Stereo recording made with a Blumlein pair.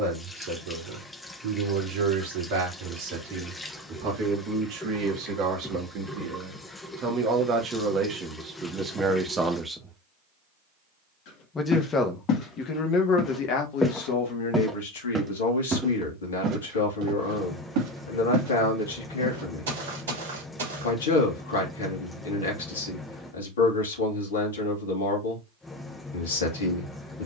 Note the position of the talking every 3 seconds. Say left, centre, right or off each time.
right, right, right, centre, left, left, left, left, left.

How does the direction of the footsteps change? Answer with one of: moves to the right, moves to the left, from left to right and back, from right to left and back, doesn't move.
moves to the right.